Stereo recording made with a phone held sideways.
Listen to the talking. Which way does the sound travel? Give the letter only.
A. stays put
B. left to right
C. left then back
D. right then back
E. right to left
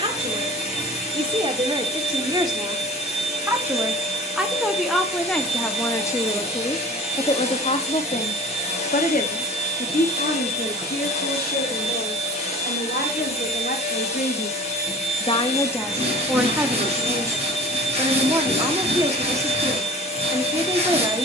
C.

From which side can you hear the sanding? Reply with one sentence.
In this clip you hear the sanding on the right.